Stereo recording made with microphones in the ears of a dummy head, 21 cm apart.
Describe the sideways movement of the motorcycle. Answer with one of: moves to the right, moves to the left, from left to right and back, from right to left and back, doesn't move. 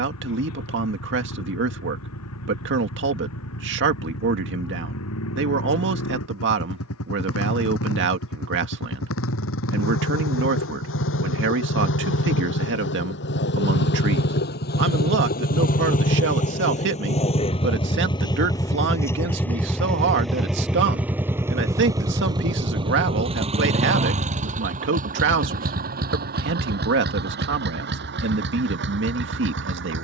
moves to the right.